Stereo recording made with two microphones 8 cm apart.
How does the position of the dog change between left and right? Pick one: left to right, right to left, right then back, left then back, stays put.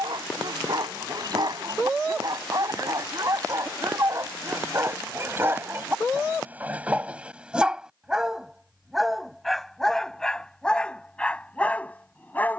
right to left.